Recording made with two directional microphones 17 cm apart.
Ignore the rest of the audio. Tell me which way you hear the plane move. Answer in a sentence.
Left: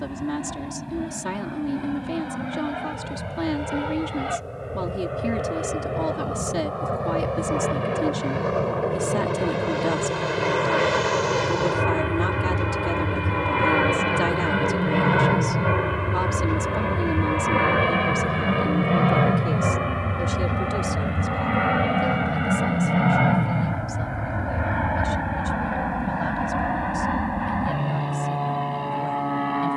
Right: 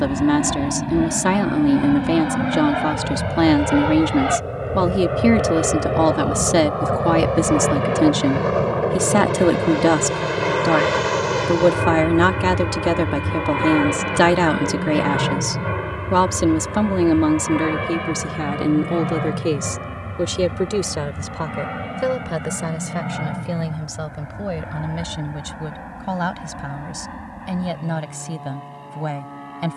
You can hear the plane move to the left.